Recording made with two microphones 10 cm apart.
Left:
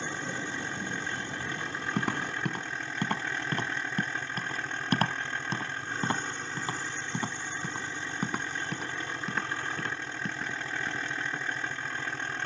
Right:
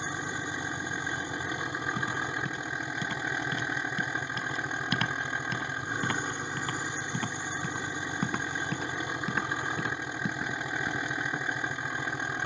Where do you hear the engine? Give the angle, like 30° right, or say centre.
20° right.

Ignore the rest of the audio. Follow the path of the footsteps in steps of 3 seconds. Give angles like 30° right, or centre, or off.
60° left, 40° left, 10° left, 10° right.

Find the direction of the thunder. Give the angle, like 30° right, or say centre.
80° left.